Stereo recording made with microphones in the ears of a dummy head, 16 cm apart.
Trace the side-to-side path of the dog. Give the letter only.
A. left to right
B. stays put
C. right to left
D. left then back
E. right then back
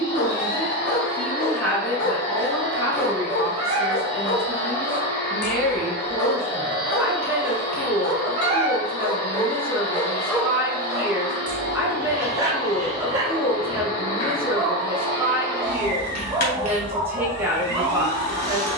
A.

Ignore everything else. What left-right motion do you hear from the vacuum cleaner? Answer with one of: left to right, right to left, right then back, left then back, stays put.
stays put.